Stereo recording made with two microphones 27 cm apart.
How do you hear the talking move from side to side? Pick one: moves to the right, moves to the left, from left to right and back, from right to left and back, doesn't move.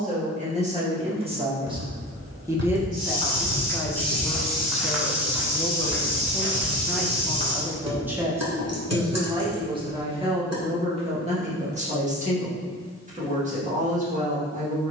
from right to left and back.